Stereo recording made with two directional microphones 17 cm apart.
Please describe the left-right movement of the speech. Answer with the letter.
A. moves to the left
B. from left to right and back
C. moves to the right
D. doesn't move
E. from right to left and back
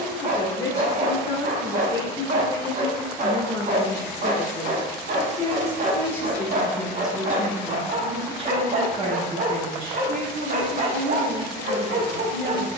C.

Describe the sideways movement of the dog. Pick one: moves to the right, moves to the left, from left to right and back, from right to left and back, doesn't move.
doesn't move.